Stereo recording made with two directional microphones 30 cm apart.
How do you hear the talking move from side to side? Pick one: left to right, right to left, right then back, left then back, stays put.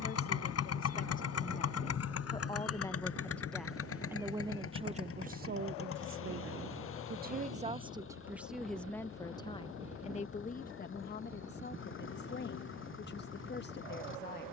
right then back.